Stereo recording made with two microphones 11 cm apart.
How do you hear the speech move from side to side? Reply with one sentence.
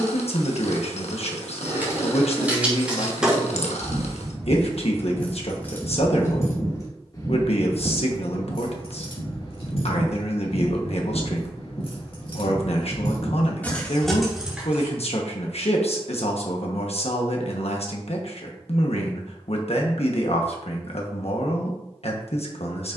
In this clip you hear the speech stay in one place.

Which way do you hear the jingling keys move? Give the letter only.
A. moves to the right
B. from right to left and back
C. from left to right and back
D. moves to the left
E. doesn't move
B.